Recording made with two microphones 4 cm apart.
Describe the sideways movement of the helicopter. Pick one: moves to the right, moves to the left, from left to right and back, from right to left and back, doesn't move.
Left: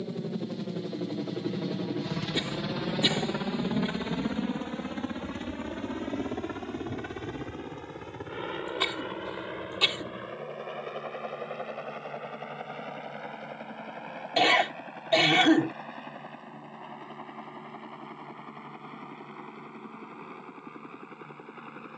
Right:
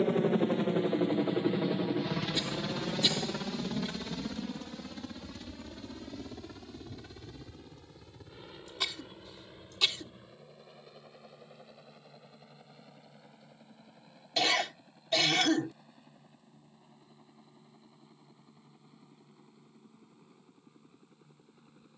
moves to the left.